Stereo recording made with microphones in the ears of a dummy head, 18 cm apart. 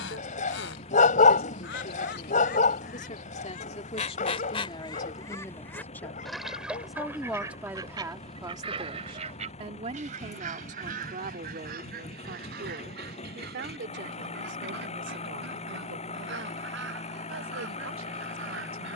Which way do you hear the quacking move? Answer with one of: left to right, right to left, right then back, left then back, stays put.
left to right.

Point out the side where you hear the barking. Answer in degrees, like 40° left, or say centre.
40° left.